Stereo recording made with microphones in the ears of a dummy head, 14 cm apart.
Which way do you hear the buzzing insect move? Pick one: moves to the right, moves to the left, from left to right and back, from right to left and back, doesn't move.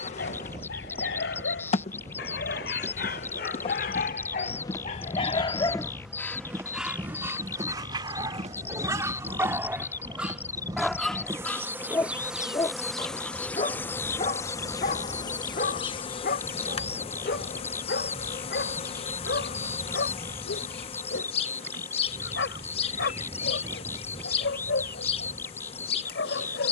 from left to right and back.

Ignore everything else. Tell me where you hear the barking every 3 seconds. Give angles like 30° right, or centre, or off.
80° left, 50° left, 10° right, centre, 40° left, 60° left, 70° left, 80° left, 80° left.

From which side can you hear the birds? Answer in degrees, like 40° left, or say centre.
10° left.